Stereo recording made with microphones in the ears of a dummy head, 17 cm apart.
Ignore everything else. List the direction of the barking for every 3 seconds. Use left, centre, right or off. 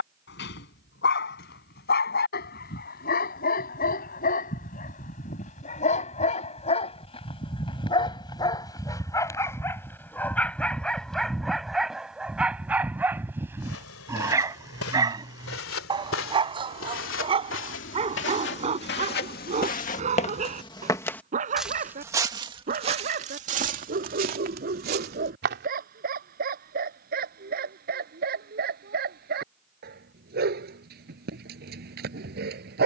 left, left, left, centre, centre, right, right, right, right, right, right.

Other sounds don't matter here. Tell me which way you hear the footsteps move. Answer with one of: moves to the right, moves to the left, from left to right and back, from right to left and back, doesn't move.
moves to the right.